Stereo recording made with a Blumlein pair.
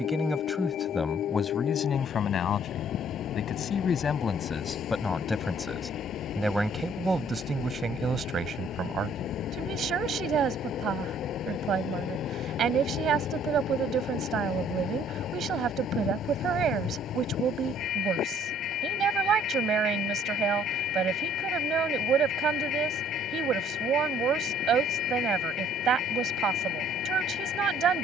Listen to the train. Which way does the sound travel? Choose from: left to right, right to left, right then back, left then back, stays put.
stays put.